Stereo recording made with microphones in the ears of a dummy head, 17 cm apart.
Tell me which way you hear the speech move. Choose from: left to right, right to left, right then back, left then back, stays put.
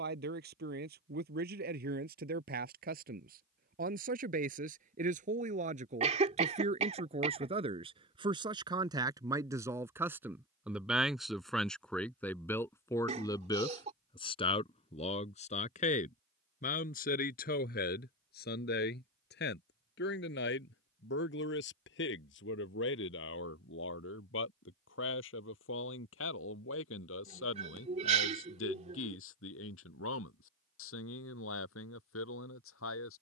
right to left.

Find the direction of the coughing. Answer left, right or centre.
right.